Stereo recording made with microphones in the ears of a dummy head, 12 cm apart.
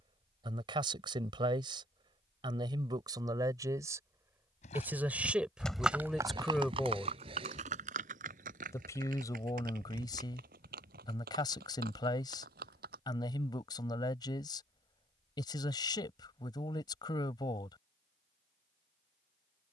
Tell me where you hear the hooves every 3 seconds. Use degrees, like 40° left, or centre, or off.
off, 20° left, 50° right, 70° right, 70° right, off, off.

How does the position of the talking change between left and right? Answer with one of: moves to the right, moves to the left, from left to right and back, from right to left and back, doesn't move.
moves to the left.